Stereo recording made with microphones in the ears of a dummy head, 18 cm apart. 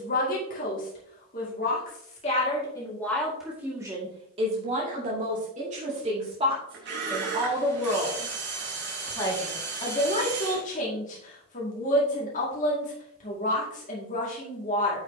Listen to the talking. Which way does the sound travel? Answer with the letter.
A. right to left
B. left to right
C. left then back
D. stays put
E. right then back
E.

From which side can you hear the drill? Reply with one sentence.
In this clip you hear the drill on the right.